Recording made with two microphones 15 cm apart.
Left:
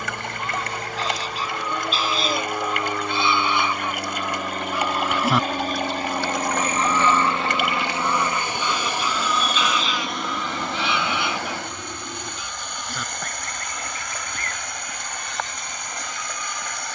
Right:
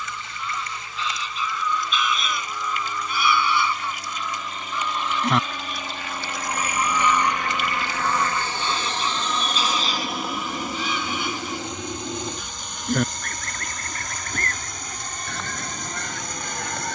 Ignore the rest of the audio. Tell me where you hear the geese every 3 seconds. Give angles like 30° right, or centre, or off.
40° left, 10° left, 20° right, 40° right, 50° right, 60° right.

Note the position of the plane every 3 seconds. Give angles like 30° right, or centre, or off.
70° left, 50° left, 30° left, 10° right, 30° right, 40° right.